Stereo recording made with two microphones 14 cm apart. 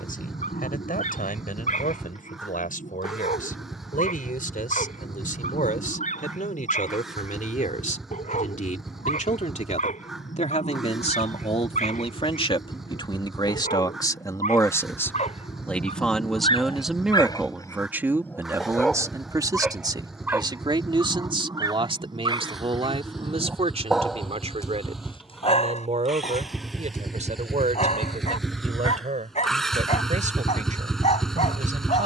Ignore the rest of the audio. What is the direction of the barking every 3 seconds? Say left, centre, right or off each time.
left, left, left, left, left, left, centre, right, left, left, left.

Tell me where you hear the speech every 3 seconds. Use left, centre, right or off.
left, left, left, left, left, centre, right, right, right, right, right.